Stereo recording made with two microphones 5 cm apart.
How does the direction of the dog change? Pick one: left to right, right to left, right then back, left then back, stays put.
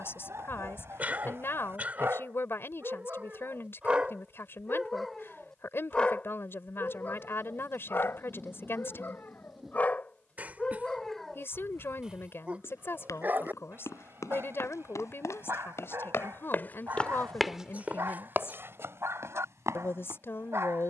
left then back.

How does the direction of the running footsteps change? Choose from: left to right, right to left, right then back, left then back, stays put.
left to right.